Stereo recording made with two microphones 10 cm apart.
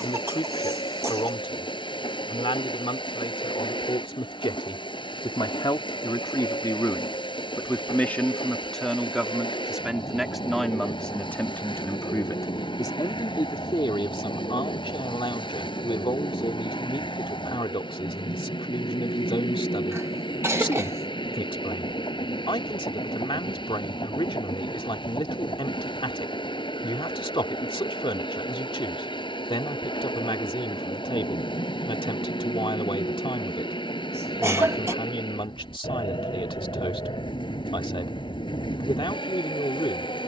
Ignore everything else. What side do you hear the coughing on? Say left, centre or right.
right.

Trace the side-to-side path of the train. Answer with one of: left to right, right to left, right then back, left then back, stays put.
stays put.